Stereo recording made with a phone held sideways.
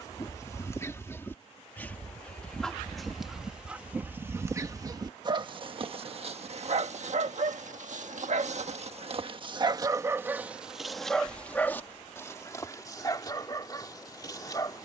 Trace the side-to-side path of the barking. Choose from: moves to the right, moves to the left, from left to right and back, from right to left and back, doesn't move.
from left to right and back.